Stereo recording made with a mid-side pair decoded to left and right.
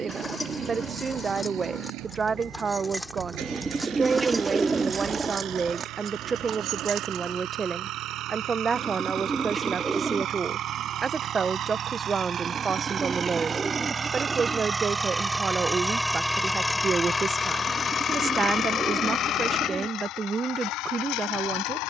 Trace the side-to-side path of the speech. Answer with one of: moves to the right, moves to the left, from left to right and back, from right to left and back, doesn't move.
doesn't move.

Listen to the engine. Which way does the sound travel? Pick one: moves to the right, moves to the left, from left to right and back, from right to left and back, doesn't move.
moves to the left.